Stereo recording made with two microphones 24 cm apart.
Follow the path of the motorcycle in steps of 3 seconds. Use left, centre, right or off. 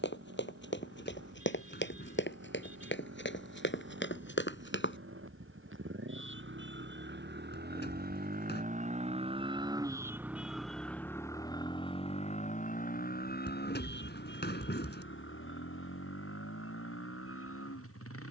right, right, right, centre, left, left.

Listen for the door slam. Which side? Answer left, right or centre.
left.